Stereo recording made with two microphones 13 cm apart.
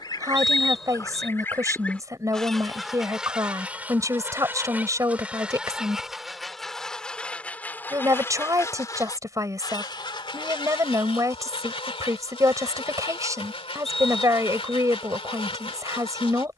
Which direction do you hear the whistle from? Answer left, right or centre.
centre.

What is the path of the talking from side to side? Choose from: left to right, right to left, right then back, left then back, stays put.
stays put.